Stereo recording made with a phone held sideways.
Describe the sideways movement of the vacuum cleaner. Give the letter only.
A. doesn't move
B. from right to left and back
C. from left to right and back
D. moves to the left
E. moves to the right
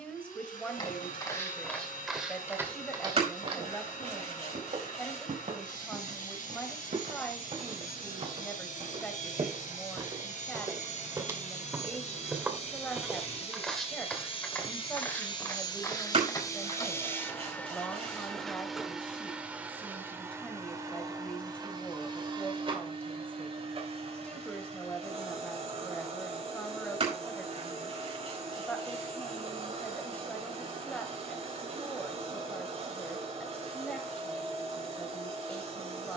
E.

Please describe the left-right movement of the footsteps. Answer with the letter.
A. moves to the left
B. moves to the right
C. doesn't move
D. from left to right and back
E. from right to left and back
D.